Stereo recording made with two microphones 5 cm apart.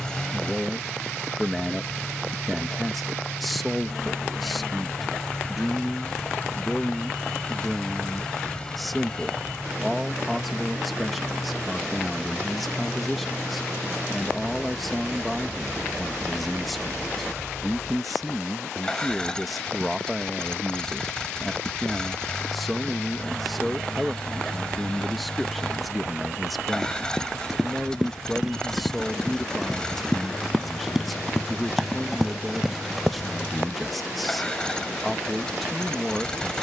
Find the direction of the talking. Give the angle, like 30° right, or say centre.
centre.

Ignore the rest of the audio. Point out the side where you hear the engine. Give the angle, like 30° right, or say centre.
20° left.